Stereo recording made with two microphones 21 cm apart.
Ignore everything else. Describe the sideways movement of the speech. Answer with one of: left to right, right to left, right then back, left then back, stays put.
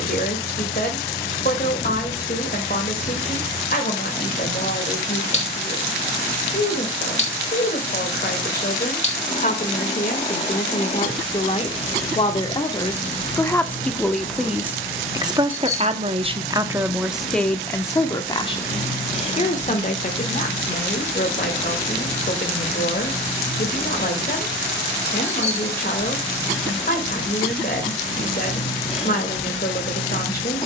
right then back.